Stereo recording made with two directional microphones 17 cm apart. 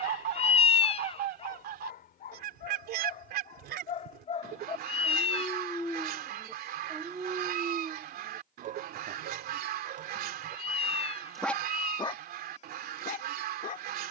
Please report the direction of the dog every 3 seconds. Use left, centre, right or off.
left, left, right, right, left.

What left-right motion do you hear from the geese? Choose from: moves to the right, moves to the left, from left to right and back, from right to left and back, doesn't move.
doesn't move.